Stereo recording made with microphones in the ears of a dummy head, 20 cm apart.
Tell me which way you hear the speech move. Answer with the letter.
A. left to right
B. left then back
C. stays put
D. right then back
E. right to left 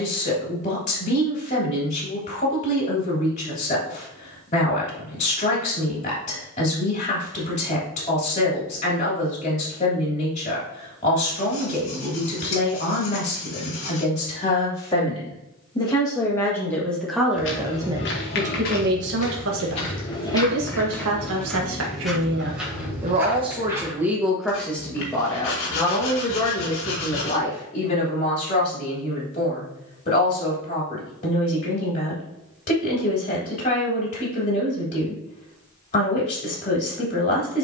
D.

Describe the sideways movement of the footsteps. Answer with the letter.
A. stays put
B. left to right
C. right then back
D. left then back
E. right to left
B.